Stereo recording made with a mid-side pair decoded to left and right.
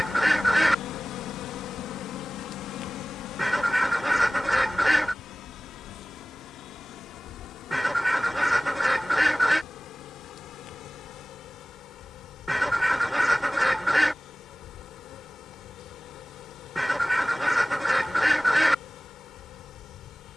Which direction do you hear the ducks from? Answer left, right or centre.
centre.